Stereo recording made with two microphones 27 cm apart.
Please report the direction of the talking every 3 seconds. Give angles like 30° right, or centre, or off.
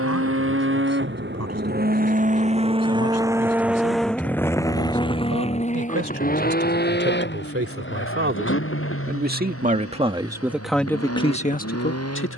70° right, 60° right, 50° right, centre.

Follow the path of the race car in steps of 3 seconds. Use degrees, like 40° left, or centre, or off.
40° right, 10° left, 40° left, 50° left.